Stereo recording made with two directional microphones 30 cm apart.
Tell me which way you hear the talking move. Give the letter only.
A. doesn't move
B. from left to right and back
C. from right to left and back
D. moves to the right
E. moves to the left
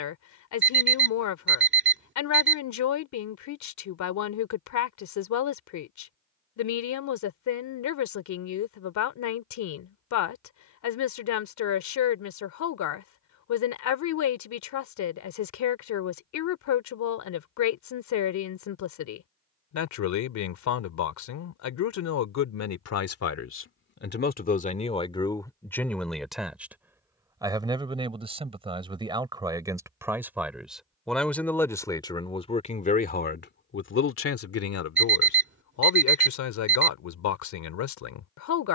B.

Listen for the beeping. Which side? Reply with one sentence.
You can hear the beeping on the right.